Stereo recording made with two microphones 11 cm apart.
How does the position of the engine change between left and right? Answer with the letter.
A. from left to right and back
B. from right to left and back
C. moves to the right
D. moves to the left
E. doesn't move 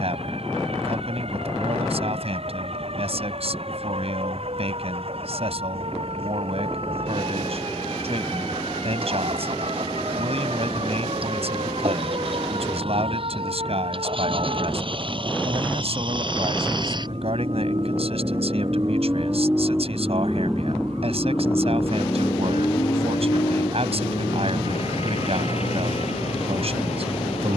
D.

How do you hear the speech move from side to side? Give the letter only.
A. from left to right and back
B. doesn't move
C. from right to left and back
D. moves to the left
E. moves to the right
B.